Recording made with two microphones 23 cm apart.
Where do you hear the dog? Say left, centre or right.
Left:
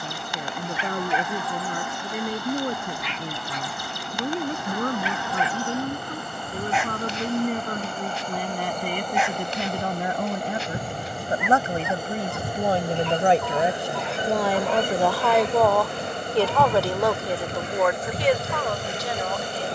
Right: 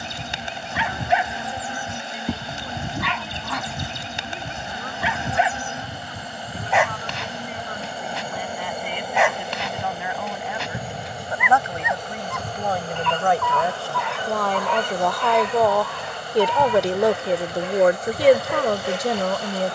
right.